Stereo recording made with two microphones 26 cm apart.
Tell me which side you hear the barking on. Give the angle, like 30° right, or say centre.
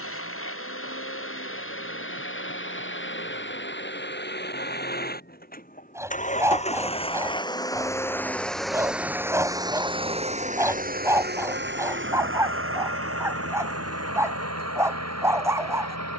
10° right.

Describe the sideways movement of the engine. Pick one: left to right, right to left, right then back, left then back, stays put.
left to right.